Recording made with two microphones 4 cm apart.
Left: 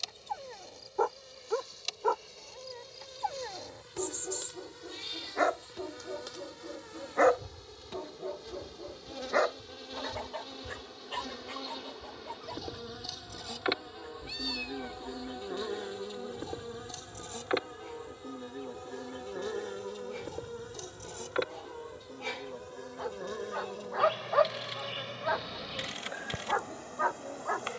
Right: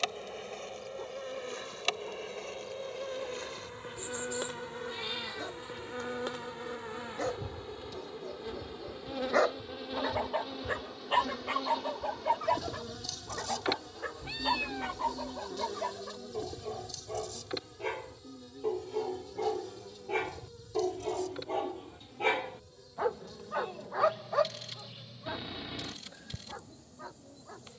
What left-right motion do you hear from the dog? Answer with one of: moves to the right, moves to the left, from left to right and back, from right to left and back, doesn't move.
from left to right and back.